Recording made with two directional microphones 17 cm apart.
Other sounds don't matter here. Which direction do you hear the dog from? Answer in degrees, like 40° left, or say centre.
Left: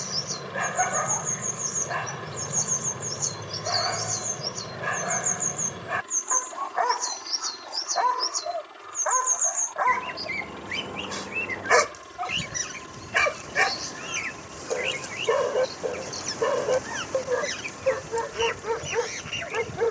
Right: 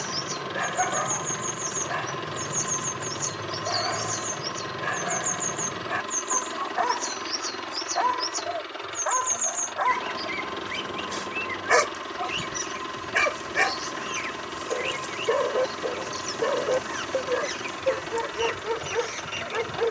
10° left.